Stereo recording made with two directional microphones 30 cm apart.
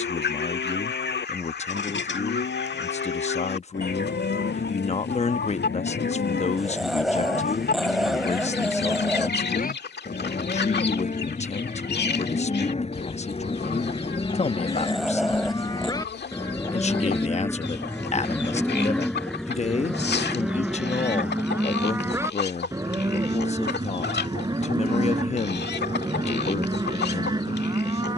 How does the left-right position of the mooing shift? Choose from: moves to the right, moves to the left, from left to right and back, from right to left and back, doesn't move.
moves to the right.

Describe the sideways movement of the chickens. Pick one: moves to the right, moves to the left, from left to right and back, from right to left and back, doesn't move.
doesn't move.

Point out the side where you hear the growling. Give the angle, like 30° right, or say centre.
centre.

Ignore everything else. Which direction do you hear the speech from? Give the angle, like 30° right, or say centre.
20° left.